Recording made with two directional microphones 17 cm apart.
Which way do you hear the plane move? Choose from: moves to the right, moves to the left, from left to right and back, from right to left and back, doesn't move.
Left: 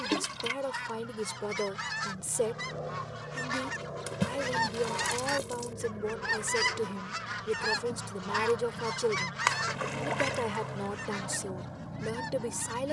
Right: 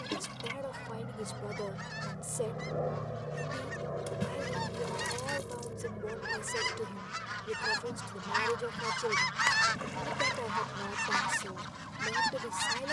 moves to the left.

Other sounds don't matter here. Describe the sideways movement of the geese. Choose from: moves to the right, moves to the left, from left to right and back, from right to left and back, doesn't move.
moves to the right.